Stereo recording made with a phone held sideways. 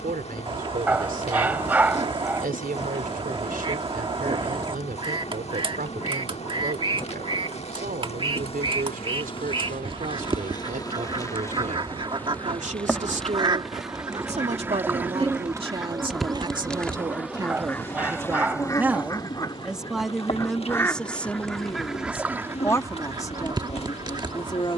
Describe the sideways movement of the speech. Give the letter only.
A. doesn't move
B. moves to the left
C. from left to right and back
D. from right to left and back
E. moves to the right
B.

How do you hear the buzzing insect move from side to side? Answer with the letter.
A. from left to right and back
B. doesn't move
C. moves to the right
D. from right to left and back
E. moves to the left
A.